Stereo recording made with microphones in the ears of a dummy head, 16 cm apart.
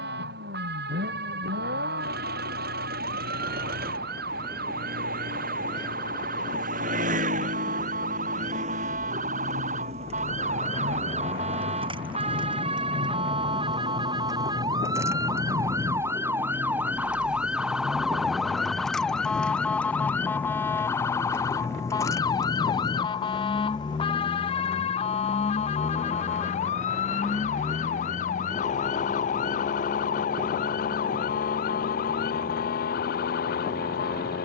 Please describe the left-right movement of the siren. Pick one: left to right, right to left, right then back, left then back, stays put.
right to left.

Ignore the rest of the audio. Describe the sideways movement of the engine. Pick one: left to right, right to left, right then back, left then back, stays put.
right to left.